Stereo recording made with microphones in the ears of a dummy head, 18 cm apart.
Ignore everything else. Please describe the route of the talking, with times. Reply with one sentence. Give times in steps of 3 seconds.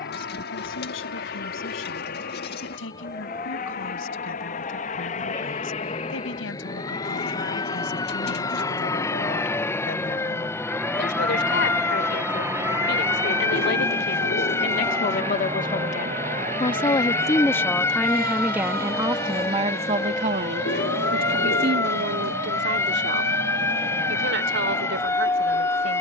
In this clip you hear the talking on the left from 0 s and on the right from 18 s.